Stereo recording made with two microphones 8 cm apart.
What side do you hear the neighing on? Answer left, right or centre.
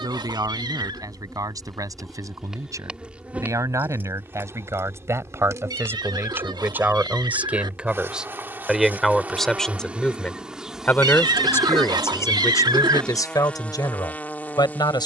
right.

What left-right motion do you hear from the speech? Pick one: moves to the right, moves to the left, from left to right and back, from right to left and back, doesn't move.
moves to the left.